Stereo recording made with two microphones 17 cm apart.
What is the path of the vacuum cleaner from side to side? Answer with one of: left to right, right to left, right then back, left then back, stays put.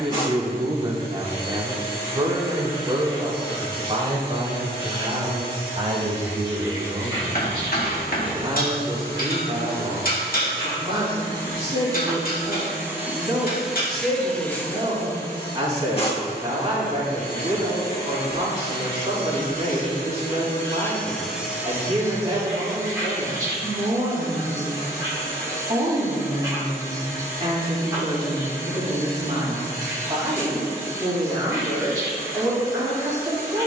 left then back.